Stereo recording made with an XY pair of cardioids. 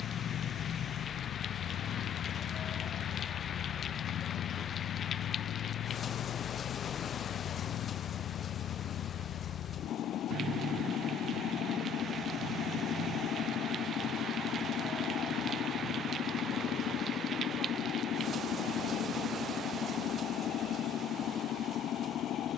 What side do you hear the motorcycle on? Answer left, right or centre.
left.